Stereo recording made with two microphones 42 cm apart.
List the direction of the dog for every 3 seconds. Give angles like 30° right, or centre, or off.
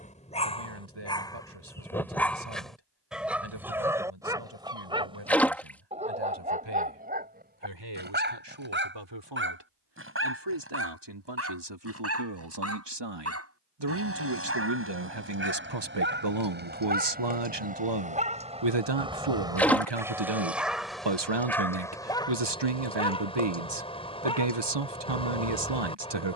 10° left, 10° right, 20° right, 30° right, 30° right, 20° right, 10° right, 10° left, 10° left.